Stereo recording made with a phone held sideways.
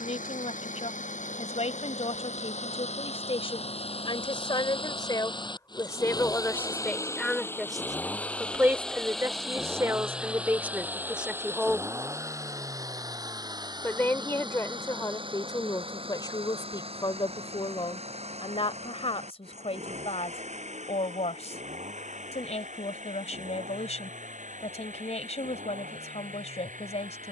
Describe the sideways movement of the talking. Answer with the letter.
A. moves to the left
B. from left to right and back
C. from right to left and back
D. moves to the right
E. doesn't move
B.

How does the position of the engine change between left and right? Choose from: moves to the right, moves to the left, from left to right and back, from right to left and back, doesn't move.
moves to the right.